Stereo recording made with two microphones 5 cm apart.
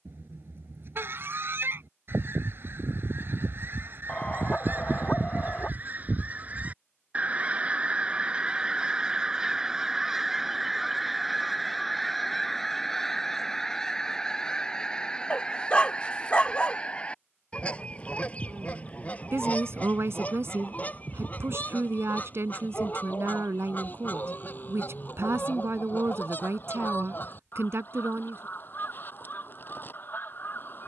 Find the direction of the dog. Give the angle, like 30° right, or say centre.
30° left.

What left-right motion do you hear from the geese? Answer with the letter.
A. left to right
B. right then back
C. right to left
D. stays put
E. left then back
C.